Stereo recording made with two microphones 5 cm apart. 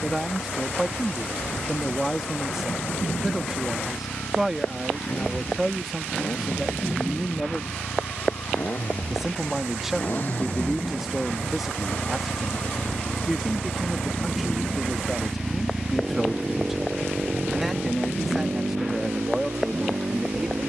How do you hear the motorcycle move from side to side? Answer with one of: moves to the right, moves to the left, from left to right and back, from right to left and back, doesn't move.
moves to the right.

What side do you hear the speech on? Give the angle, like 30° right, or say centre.
10° right.